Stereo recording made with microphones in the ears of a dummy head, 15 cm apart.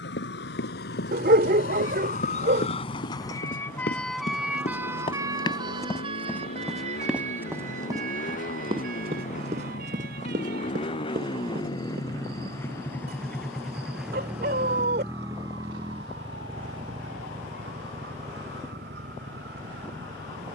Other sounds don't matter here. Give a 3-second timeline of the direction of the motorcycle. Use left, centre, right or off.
left, left, left, left, centre, right, right.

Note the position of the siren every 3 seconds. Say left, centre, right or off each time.
left, centre, right, right, right, right, right.